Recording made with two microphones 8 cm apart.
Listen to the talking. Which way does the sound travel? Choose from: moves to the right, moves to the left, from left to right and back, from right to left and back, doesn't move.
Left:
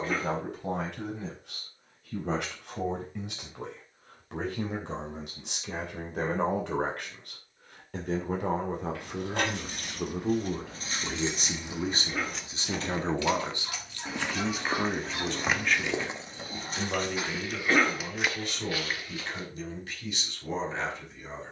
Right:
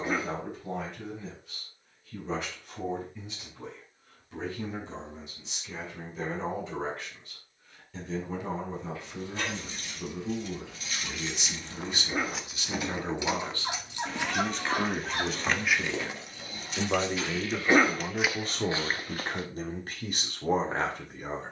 moves to the right.